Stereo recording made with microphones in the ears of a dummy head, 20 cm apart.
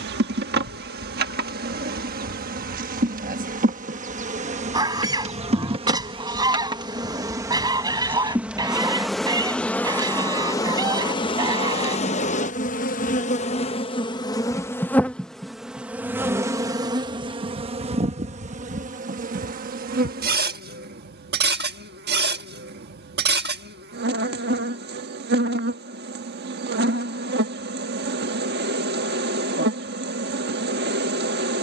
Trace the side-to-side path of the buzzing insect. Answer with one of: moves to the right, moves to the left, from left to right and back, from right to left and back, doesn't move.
from right to left and back.